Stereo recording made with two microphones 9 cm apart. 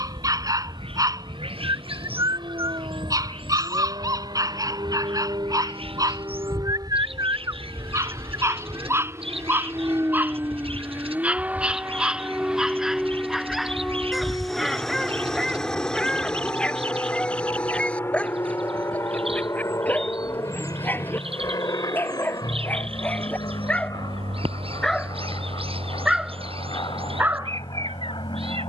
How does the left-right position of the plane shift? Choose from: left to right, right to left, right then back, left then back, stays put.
right to left.